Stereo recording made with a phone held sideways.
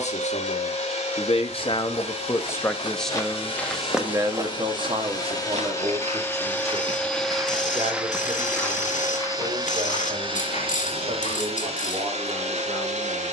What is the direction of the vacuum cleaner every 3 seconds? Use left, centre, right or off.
left, left, centre, right, right.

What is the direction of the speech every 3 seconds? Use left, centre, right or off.
left, right, right, right, right.